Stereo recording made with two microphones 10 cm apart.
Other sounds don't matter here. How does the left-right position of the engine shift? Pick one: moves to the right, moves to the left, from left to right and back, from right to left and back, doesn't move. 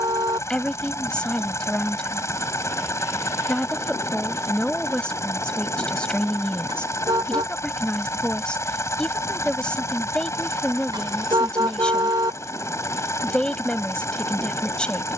doesn't move.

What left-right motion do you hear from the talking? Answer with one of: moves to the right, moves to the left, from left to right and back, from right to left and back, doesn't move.
doesn't move.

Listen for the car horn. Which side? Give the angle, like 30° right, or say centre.
50° right.